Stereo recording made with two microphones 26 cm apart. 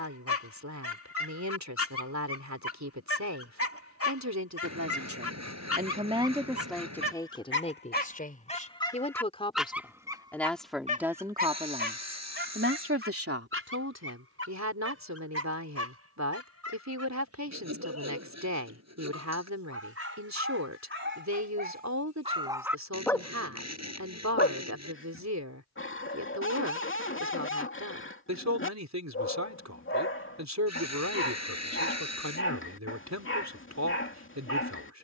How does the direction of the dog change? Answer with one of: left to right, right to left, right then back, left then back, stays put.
right then back.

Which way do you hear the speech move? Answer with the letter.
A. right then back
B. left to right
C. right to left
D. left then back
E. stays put
D.